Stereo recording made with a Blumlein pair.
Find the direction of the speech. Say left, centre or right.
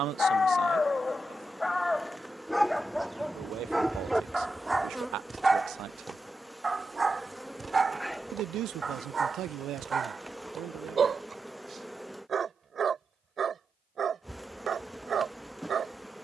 right.